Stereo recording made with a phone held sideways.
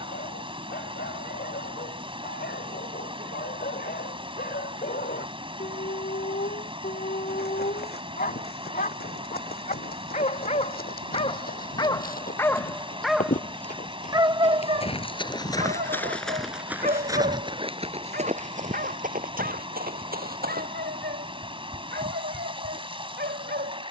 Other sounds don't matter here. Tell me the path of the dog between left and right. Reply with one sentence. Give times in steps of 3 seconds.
You can hear the dog on the left from 0 s, in the centre from 12 s and on the right from 15 s.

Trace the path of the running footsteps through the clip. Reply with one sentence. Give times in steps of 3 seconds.
You can hear the running footsteps not at all from 0 s, on the left from 6 s, in the centre from 15 s, on the right from 18 s and not at all from 21 s.